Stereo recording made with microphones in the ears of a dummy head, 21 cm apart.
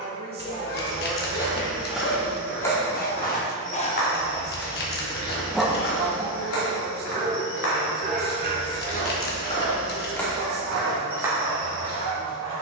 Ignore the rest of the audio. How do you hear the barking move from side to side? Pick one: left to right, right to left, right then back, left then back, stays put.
left to right.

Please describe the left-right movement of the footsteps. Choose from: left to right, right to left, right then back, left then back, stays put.
left then back.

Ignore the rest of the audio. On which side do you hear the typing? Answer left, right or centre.
left.